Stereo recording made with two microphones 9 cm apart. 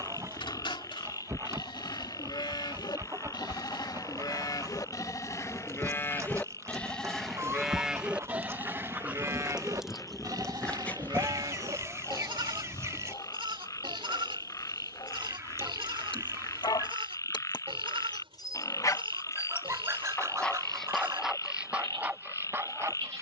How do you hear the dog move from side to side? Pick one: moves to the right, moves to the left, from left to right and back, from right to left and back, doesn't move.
from right to left and back.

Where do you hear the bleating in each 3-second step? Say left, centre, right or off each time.
left, left, centre, right, right, right, right, right.